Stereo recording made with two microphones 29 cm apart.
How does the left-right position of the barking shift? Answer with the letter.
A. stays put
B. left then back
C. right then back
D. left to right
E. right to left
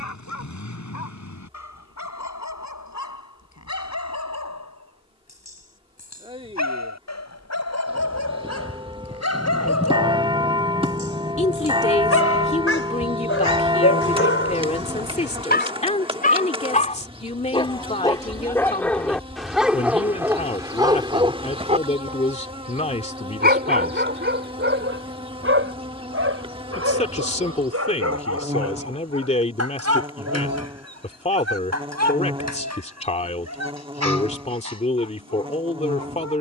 D.